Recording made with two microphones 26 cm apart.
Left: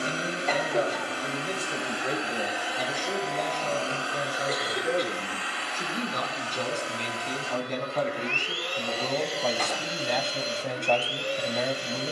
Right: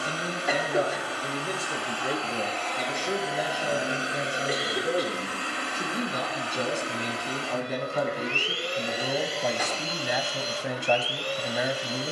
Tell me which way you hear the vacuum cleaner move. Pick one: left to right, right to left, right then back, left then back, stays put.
right then back.